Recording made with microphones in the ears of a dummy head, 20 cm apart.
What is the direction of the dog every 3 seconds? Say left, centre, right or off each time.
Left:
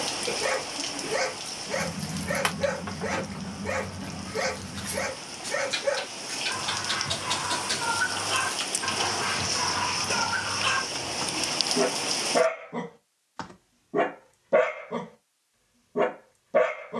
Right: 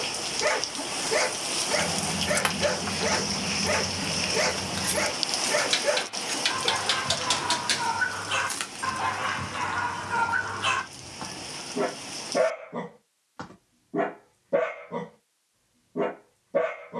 right, right, right, centre, left, left.